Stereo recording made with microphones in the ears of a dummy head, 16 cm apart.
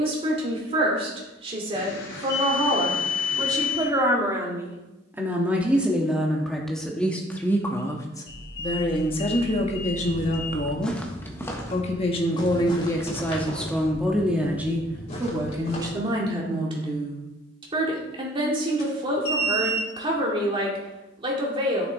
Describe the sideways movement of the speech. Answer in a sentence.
In this clip you hear the speech move from right to left and back again.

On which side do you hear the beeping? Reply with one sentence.
In this clip you hear the beeping on the left.